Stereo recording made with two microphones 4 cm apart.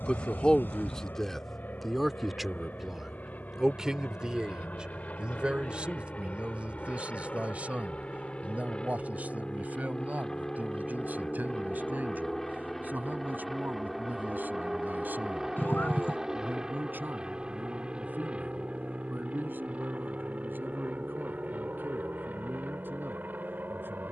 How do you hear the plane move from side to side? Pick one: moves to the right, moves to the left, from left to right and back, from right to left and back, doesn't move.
moves to the right.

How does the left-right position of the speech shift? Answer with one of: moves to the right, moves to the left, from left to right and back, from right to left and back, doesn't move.
moves to the right.